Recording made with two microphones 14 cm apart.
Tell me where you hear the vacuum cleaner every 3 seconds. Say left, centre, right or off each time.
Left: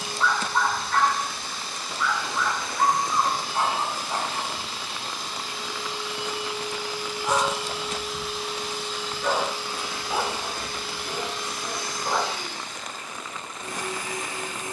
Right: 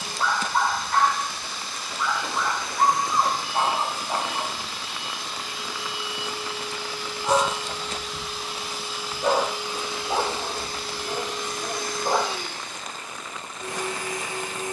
left, left, centre, right, right.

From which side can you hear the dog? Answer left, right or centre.
right.